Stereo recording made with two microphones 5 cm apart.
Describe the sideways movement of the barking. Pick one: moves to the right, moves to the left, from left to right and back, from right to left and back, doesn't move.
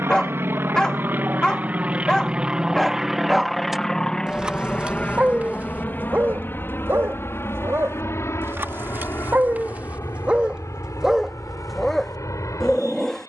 from left to right and back.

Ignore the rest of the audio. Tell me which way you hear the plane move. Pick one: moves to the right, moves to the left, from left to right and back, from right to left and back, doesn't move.
moves to the left.